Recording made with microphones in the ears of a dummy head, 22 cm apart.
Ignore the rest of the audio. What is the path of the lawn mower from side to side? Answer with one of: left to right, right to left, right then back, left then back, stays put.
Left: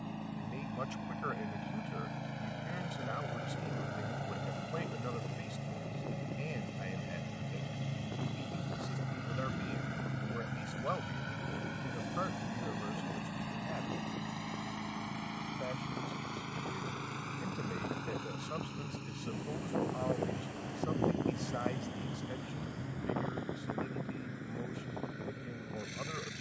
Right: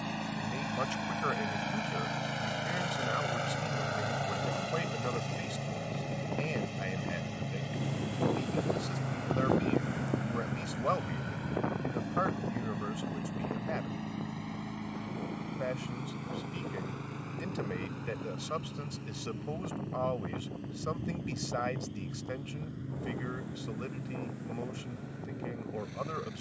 right to left.